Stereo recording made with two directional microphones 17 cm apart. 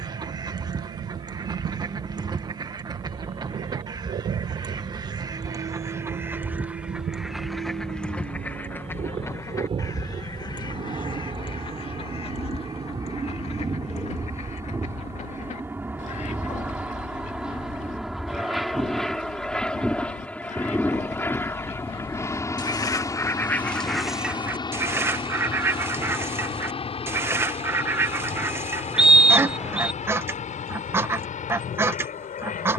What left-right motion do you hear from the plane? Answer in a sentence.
You can hear the plane go from the right side to the left.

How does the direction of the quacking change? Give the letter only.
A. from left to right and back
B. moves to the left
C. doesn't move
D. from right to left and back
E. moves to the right
D.